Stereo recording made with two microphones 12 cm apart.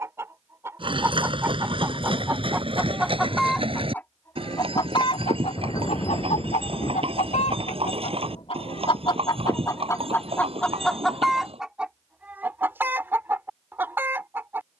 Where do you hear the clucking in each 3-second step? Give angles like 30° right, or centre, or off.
20° right, 30° left, 70° left, 10° left, 20° right.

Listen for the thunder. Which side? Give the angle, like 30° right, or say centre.
30° left.